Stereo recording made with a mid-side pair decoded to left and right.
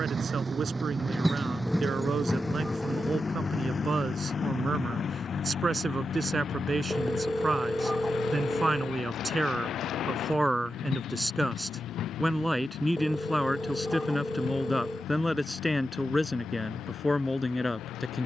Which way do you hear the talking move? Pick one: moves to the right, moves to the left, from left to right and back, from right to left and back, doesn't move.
moves to the left.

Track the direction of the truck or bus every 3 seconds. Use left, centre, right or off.
centre, left, left, left, left, left.